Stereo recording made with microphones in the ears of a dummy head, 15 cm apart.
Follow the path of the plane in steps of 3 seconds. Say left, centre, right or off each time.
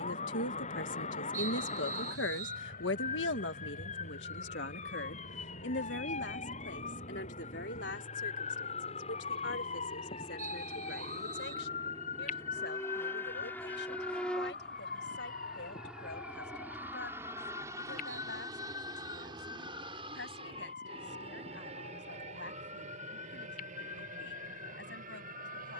left, left, left, left, centre, centre, right, right, right.